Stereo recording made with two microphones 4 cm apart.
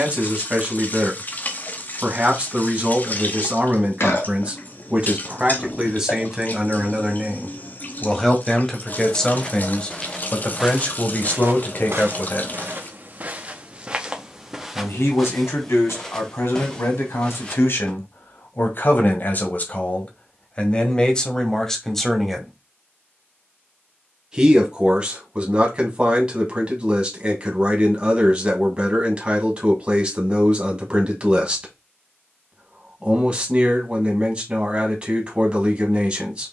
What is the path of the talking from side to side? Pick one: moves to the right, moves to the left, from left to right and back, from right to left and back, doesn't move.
from right to left and back.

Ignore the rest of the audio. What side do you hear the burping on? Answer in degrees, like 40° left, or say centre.
60° left.